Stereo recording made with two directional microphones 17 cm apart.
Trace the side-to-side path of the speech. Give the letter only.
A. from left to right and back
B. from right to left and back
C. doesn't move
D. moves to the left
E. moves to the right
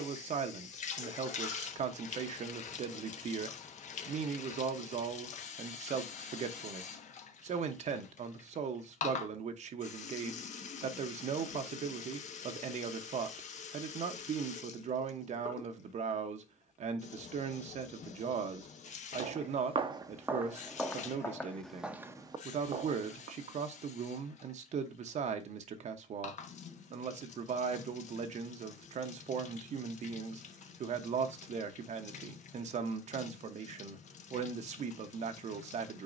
C.